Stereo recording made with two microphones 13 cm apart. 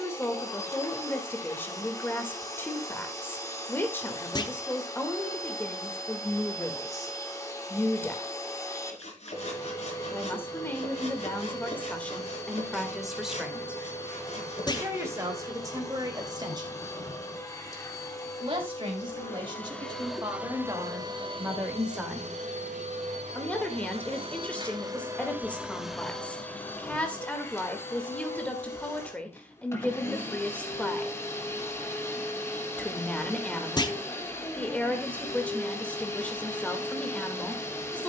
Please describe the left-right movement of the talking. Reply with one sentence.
In this clip you hear the talking move from left to right and back again.